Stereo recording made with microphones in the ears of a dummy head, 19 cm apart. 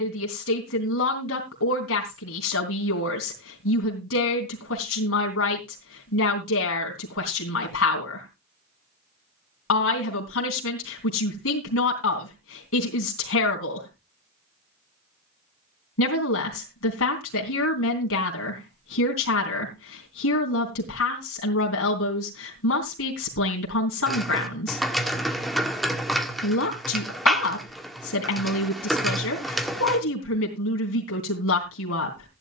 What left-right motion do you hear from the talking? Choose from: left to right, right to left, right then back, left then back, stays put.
stays put.